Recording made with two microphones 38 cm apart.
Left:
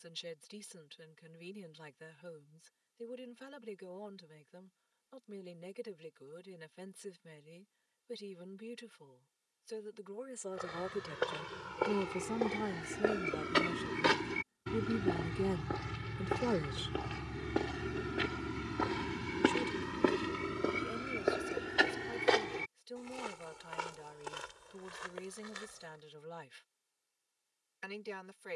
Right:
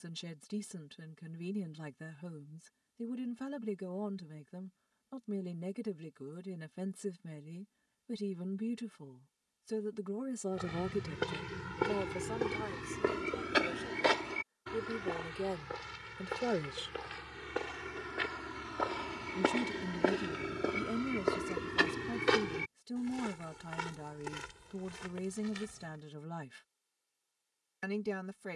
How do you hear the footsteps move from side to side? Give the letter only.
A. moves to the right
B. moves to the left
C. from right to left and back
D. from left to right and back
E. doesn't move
C.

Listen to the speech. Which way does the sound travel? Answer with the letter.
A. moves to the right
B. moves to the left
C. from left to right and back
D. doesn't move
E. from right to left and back
E.